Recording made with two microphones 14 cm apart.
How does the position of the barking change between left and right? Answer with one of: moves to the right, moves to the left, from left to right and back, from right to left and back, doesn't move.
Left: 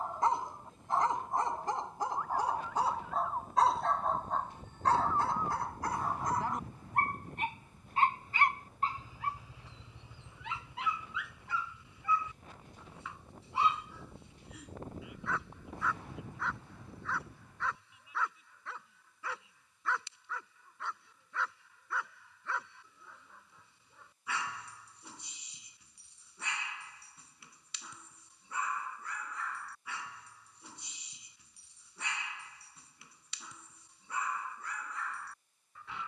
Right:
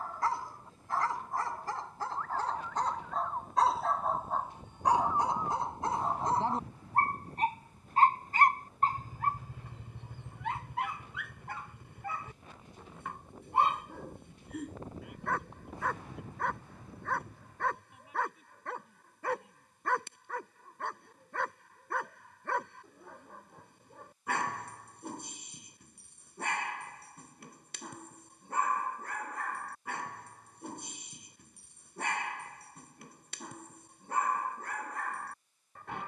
moves to the right.